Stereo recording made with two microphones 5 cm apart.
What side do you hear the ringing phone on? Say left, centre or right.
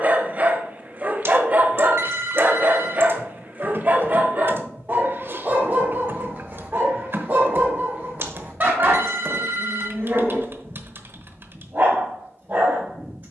right.